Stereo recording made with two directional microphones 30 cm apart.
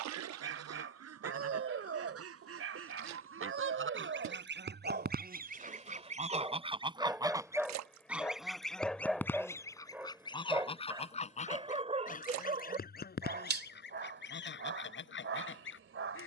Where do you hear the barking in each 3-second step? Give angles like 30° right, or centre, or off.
50° right, 40° right, 10° right, 10° right, 40° right, 50° right.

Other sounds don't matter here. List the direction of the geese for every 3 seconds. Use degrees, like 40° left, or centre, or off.
60° right, 40° right, 10° right, 20° left, 40° left, 40° left.